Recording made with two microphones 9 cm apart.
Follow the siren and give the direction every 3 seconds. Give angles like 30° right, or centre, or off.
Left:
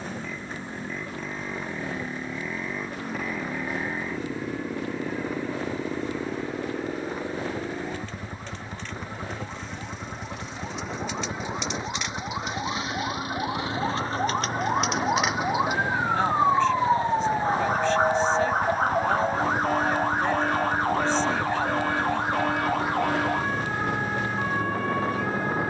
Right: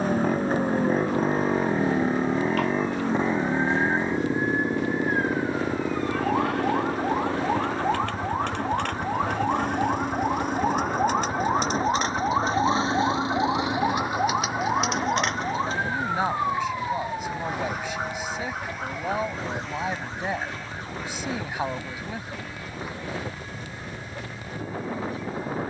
80° right, 80° right, 70° right, 50° right, 20° right, 20° left, 50° left, 60° left, 60° left.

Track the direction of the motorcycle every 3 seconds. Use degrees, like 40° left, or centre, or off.
40° right, 20° right, centre, 20° left, 30° left, 40° left, 40° left, 50° left, 50° left.